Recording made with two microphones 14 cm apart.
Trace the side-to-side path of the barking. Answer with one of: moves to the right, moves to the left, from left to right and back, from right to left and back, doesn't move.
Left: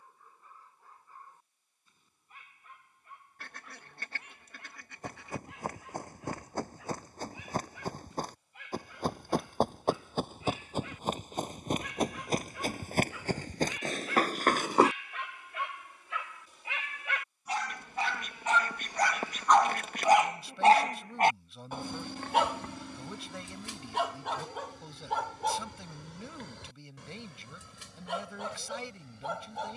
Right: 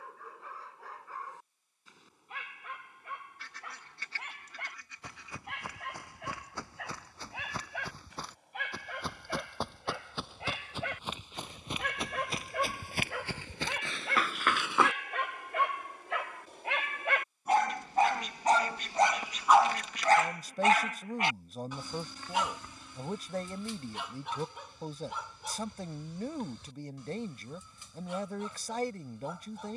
moves to the left.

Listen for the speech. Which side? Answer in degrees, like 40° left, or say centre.
40° right.